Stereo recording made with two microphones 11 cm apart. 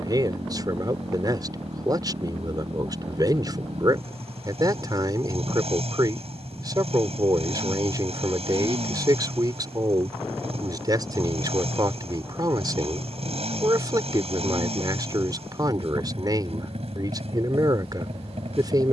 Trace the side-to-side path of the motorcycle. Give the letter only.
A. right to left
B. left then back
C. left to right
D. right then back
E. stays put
E.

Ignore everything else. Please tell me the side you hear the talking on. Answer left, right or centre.
right.